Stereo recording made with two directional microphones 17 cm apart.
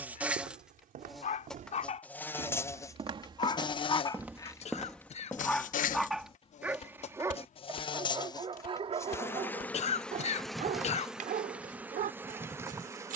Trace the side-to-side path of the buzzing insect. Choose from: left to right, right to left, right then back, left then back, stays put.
left then back.